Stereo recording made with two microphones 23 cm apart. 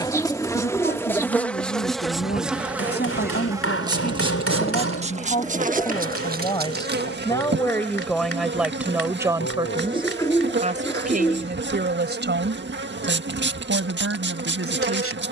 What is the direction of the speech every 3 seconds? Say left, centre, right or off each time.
left, left, centre, right, right.